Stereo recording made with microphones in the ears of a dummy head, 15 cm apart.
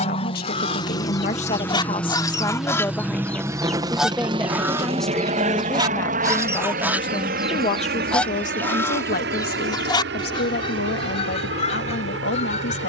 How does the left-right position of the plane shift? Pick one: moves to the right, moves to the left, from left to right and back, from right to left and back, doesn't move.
moves to the right.